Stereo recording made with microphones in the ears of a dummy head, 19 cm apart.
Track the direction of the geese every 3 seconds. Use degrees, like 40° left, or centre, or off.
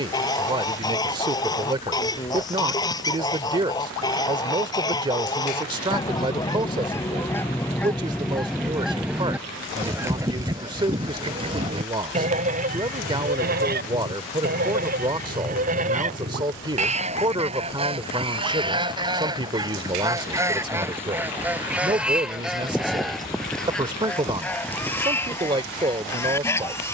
20° left, 20° left, 10° left, 20° right, 40° right, 30° right, 20° right, centre, 10° left.